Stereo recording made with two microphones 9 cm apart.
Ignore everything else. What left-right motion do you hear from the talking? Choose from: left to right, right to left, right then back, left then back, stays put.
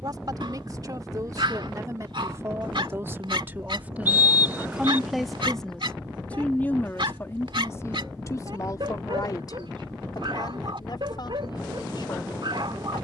right to left.